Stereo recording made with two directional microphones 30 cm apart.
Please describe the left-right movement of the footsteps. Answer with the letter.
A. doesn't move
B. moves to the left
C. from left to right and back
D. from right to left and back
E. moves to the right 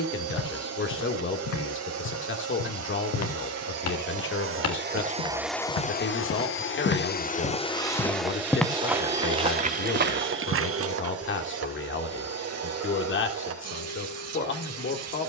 E.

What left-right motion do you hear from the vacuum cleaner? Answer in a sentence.
In this clip you hear the vacuum cleaner move from right to left and back again.